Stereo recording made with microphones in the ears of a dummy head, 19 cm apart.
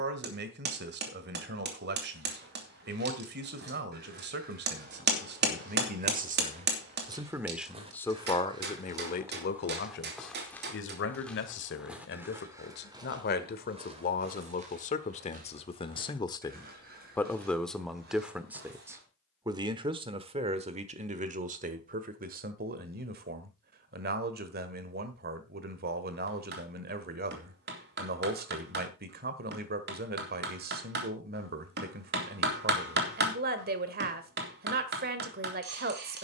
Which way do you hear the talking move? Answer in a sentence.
You can hear the talking go left and come back.